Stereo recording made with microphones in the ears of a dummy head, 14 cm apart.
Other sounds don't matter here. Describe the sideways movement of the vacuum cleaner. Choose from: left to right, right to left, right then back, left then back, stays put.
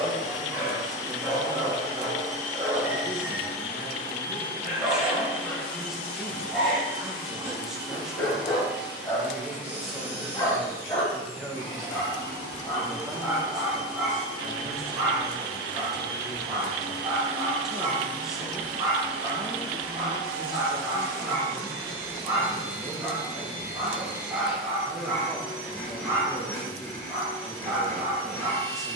right then back.